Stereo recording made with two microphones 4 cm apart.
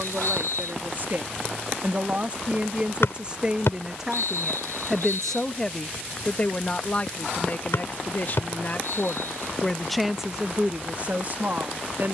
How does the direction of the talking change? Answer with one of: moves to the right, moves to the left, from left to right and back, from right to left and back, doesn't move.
from right to left and back.